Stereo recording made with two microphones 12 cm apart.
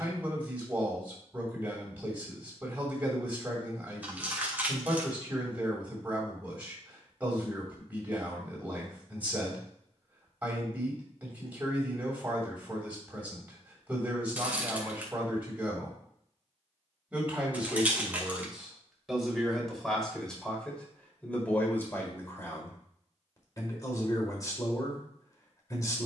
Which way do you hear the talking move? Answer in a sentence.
You can hear the talking move to the left.